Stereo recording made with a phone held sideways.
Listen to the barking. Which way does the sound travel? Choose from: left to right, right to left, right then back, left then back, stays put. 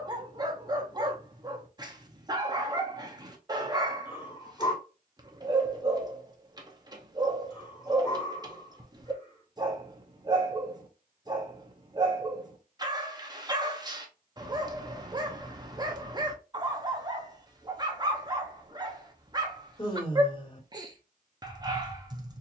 stays put.